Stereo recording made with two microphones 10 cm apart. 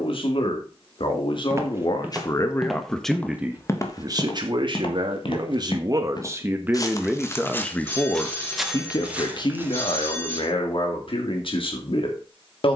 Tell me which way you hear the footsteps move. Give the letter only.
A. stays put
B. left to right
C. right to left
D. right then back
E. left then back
E.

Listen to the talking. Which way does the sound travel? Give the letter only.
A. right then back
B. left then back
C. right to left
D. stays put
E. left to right
A.